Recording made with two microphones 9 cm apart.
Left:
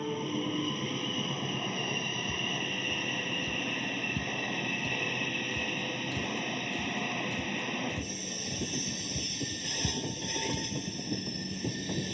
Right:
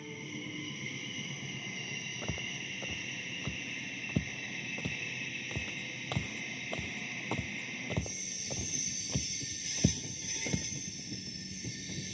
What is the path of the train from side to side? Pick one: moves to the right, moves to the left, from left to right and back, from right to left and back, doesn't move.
doesn't move.